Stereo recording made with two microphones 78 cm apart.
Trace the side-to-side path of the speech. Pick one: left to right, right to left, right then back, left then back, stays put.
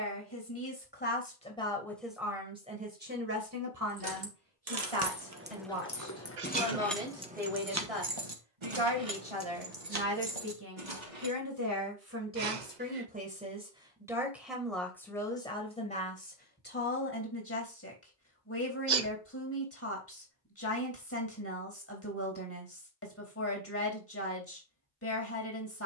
right then back.